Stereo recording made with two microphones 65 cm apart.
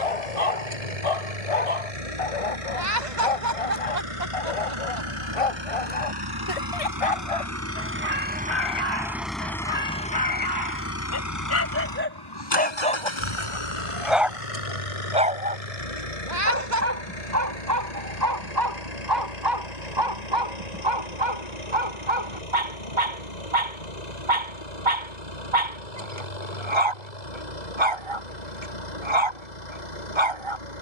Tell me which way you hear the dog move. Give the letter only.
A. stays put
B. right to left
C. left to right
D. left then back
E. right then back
C.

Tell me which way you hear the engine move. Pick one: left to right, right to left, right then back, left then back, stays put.
right to left.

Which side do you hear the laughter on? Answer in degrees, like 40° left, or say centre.
80° right.